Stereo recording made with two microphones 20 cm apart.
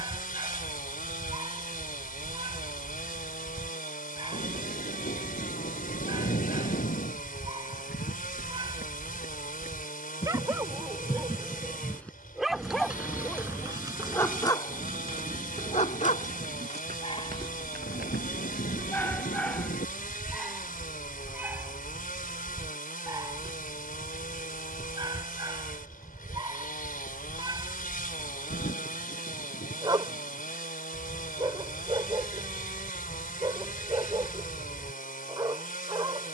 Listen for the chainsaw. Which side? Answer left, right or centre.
left.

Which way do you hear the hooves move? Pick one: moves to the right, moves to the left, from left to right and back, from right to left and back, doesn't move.
moves to the right.